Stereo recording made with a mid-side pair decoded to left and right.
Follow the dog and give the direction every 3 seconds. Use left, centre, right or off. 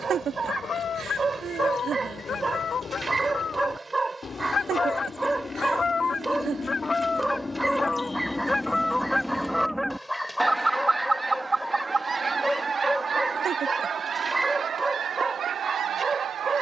right, right, centre, centre, centre, right.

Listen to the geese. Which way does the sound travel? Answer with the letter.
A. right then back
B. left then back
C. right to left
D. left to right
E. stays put
D.